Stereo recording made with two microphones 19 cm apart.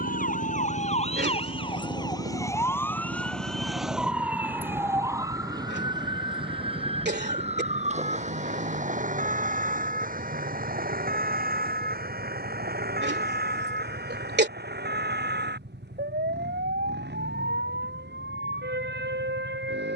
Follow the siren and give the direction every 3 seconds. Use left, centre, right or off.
left, centre, right, right, right, right, right.